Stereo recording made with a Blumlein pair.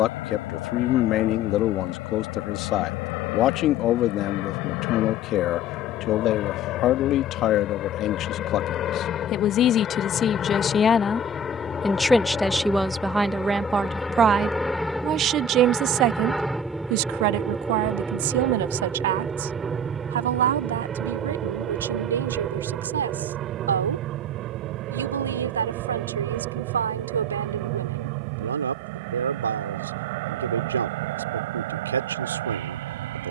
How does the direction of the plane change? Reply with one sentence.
You can hear the plane move to the right.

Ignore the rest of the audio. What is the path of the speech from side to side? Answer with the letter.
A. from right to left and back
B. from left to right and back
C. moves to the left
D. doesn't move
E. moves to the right
E.